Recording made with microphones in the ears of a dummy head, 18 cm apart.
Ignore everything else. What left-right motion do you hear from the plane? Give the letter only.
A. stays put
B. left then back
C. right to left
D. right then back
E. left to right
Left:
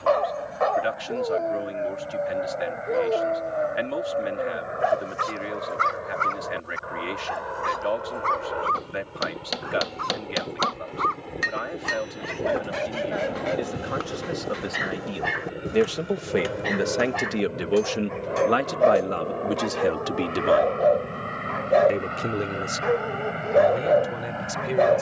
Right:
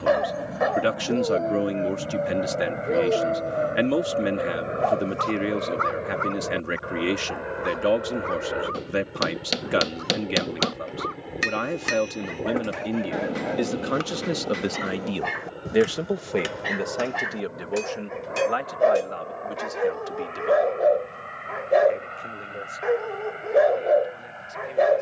C.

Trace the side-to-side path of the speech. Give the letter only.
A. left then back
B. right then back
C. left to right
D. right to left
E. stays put
D.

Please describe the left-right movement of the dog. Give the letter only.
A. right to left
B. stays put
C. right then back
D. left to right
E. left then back
E.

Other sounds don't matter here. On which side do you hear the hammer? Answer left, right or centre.
right.